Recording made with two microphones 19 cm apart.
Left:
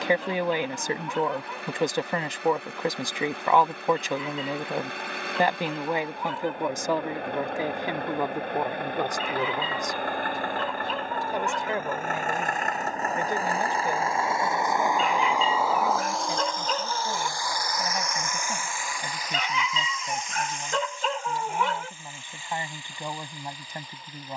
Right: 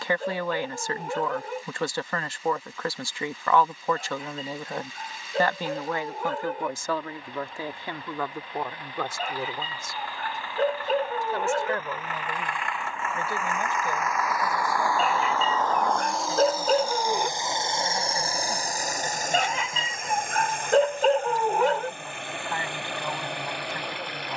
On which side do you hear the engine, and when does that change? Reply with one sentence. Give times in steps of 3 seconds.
In this clip you hear the engine on the left from 0 s, in the centre from 15 s and on the right from 18 s.